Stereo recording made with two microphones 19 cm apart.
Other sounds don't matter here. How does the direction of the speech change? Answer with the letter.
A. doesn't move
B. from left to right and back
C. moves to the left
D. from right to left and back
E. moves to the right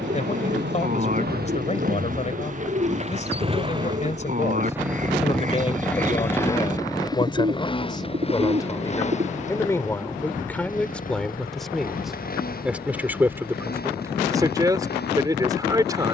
E.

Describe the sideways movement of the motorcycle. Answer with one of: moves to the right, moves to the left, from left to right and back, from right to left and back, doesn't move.
moves to the left.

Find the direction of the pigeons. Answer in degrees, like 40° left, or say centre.
40° right.